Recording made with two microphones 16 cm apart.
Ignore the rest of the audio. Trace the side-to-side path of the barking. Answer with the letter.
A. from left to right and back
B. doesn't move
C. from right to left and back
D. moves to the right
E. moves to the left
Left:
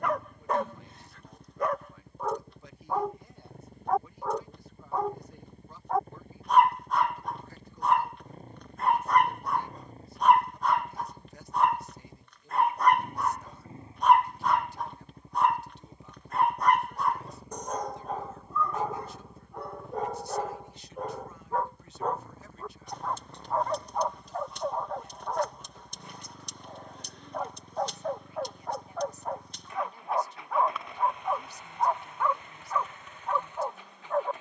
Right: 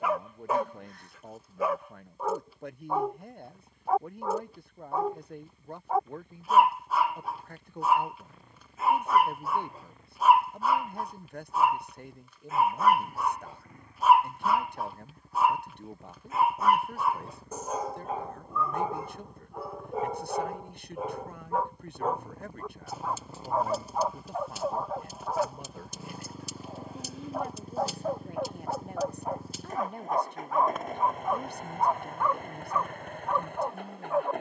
B.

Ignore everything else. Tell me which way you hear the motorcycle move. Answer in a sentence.
You can hear the motorcycle move to the right.